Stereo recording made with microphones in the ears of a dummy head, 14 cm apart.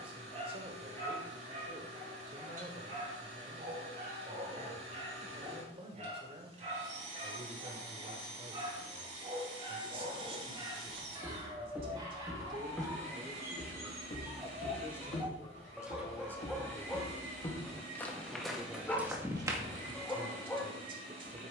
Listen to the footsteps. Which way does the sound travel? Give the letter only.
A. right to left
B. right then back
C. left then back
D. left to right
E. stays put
C.